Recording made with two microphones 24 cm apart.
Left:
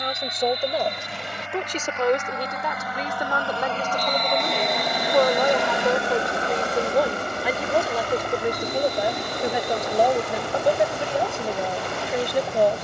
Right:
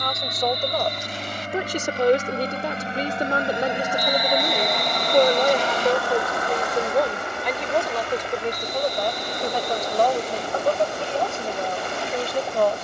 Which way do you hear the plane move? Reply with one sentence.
You can hear the plane travel towards the left.